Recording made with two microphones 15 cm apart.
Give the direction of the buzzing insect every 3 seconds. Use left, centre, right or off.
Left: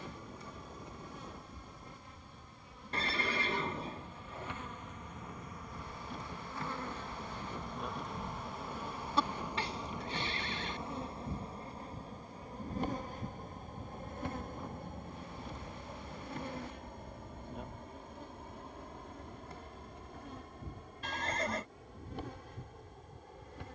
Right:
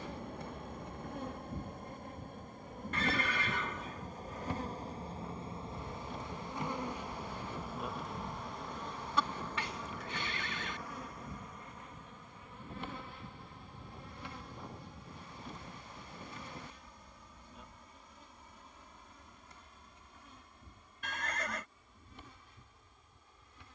right, right, centre, left, left, left, left, left.